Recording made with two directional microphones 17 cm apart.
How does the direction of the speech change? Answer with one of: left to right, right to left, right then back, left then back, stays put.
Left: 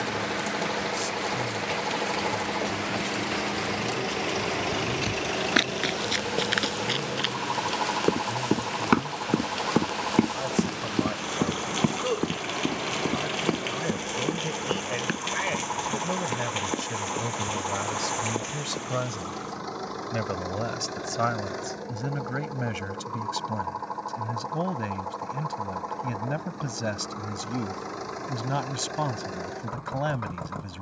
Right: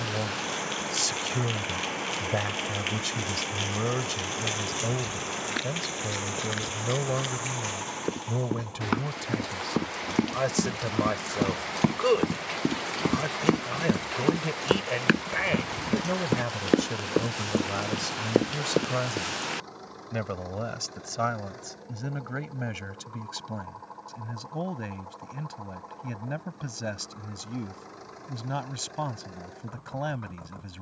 right to left.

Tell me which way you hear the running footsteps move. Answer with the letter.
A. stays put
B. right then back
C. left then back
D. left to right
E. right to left
D.